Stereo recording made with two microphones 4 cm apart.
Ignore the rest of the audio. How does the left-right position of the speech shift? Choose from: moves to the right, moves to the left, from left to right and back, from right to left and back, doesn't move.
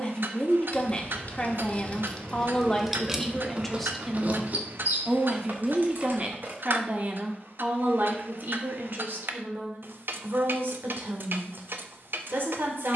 moves to the right.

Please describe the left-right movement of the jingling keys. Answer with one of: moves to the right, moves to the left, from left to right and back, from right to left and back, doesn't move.
moves to the right.